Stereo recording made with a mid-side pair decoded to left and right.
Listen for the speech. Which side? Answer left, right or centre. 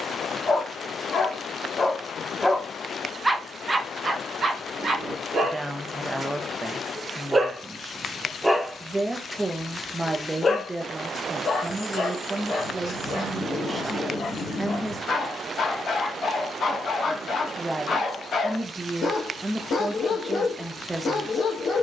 right.